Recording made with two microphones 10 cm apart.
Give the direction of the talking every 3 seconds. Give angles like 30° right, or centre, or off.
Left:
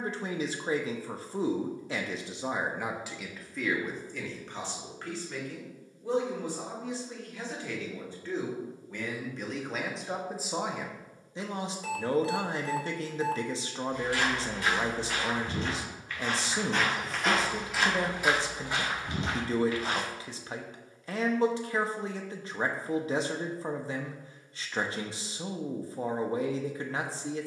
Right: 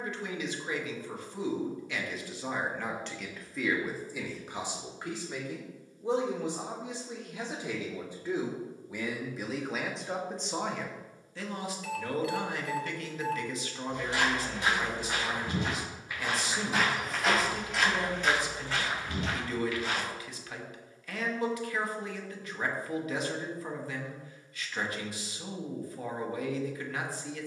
30° left, 10° right, 20° right, 10° left, 30° left, 30° left, 30° left, 30° left, 30° left.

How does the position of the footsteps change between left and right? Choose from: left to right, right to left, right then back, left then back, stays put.
right to left.